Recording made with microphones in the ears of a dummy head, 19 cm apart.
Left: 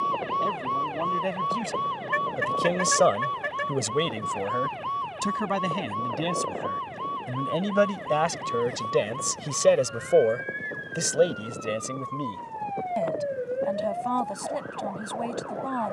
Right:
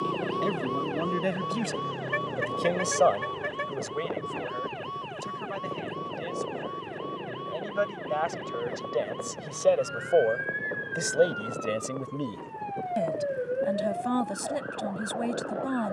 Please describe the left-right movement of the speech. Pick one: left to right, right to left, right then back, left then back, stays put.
left then back.